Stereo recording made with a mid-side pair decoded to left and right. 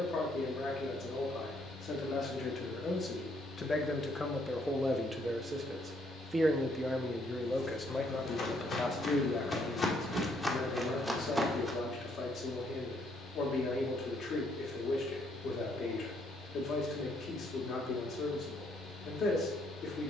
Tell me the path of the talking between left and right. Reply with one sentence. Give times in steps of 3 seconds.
You can hear the talking on the left from 0 s, in the centre from 3 s and on the left from 9 s.